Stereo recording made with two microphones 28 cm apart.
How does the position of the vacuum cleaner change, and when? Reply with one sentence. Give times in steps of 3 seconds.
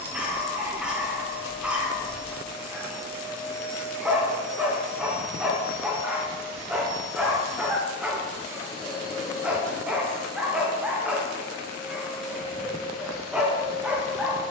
In this clip you hear the vacuum cleaner on the left from 0 s, in the centre from 9 s and on the right from 12 s.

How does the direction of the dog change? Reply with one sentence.
In this clip you hear the dog stay in one place.